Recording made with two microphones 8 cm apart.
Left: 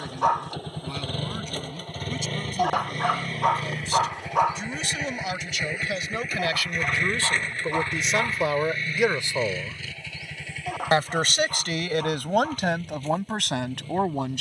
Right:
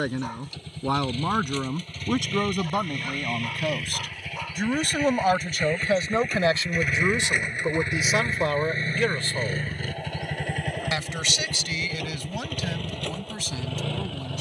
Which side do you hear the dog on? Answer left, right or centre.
left.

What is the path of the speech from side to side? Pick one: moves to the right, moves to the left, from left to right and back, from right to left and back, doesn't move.
moves to the left.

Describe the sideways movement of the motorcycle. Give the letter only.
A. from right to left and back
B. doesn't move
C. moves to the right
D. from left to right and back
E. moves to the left
C.